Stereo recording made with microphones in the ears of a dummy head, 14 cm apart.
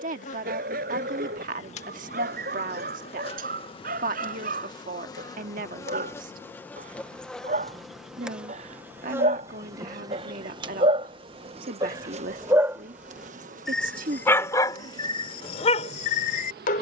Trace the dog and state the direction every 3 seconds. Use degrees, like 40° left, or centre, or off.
60° right, 60° right, 50° right, 40° right, centre, 50° left.